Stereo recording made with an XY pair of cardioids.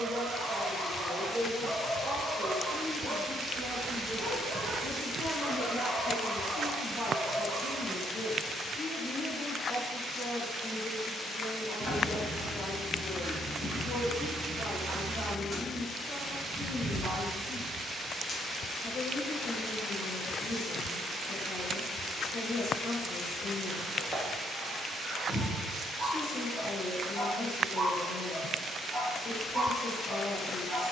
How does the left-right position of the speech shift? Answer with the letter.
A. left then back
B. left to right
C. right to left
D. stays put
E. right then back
C.